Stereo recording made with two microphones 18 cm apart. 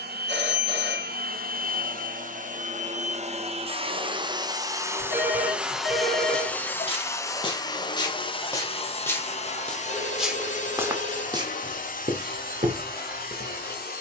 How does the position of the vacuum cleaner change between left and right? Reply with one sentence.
In this clip you hear the vacuum cleaner go from the right side to the left.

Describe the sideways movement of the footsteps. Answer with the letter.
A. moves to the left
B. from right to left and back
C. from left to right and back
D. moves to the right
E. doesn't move
D.